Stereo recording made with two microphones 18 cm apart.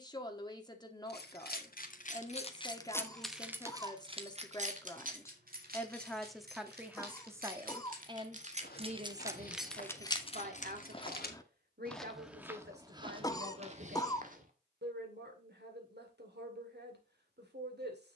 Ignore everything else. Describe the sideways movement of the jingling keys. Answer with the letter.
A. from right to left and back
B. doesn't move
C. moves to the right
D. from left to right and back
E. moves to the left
D.